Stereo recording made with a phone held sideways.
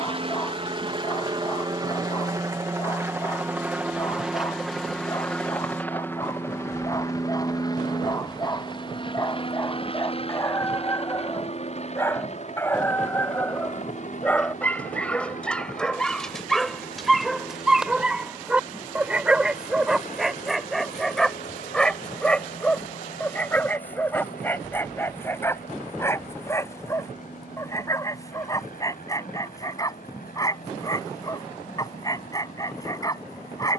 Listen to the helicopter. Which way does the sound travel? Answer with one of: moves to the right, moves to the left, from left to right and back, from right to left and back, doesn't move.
moves to the left.